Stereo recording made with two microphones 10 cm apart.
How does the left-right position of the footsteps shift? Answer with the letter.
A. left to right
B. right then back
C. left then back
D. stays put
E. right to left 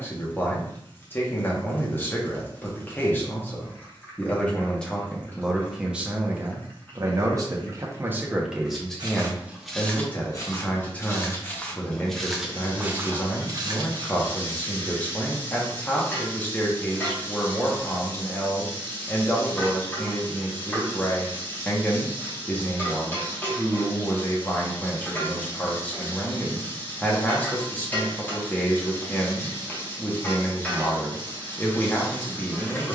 C.